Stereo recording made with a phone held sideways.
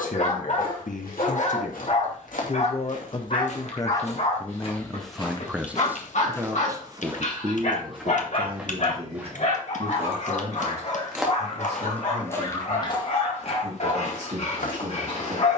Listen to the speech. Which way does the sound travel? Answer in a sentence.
In this clip you hear the speech move from left to right.